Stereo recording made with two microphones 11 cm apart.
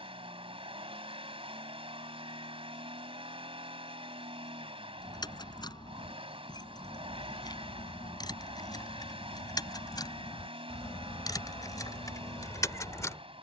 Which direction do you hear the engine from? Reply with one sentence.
In this clip you hear the engine on the right.